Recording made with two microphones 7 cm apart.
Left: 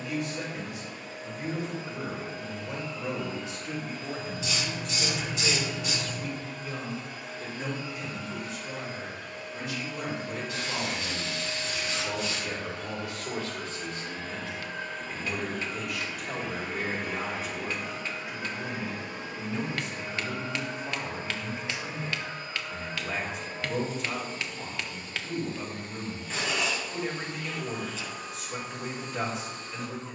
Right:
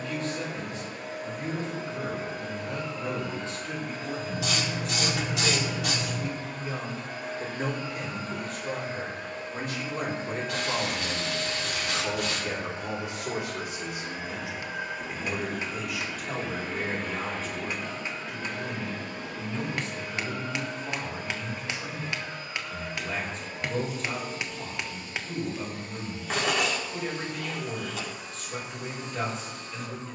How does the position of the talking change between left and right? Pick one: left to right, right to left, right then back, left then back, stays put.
right then back.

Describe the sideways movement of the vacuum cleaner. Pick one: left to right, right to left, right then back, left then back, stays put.
right to left.